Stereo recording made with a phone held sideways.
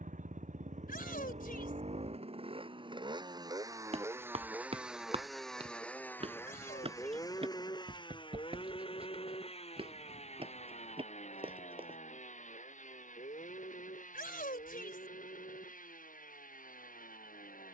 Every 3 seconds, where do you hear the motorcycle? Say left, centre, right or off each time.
right, centre, left, left, left, left.